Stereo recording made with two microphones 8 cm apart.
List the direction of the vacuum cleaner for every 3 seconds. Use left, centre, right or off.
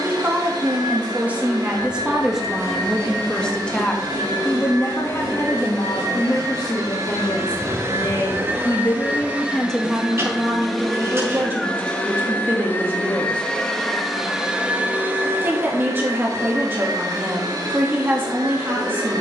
right, right, right, centre, centre, right, right.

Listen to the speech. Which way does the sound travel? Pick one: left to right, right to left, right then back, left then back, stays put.
left then back.